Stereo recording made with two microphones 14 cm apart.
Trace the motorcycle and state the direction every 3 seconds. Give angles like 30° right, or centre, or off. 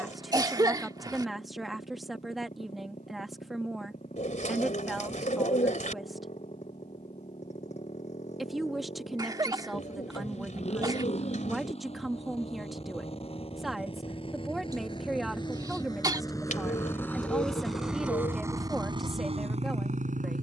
60° left, 60° left, 60° left, 50° left, 40° left, 20° left, 40° right.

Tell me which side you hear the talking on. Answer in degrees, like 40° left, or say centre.
centre.